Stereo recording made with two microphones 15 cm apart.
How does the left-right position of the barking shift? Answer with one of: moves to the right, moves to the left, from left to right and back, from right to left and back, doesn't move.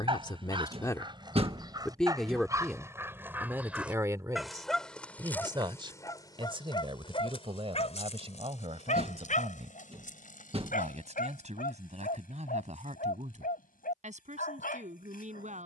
moves to the left.